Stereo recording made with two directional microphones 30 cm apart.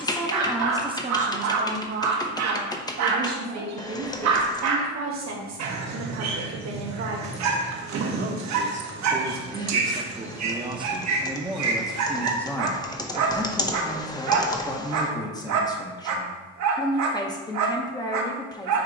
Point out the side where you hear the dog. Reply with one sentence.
You can hear the dog on the right.